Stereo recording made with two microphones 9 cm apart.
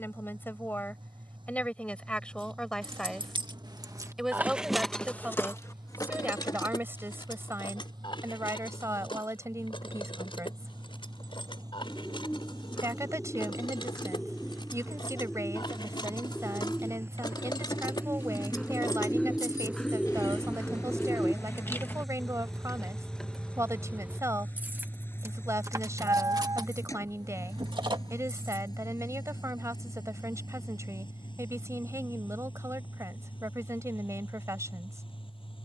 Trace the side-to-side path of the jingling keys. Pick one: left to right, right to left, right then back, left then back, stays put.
left then back.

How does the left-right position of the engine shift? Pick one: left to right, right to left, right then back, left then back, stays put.
right to left.